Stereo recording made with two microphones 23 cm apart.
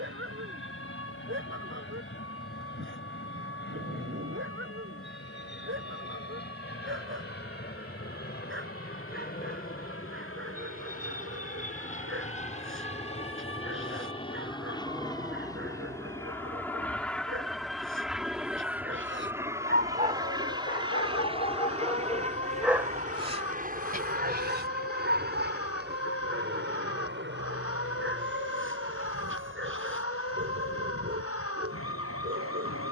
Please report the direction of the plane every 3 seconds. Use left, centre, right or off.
left, left, left, left, left, centre, centre, right, right, right, right.